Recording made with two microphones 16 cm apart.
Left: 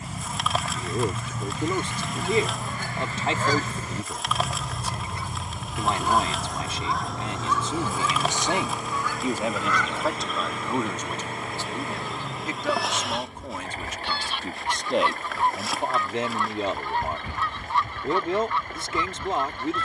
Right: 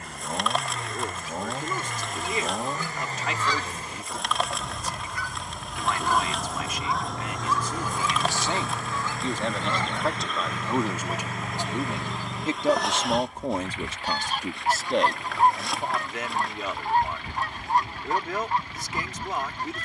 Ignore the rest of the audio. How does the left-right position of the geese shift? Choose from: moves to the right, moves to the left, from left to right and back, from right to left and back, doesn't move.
moves to the right.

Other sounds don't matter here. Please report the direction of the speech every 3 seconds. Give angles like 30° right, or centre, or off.
30° left, 30° left, 30° left, centre, 30° right, 30° left, 30° left.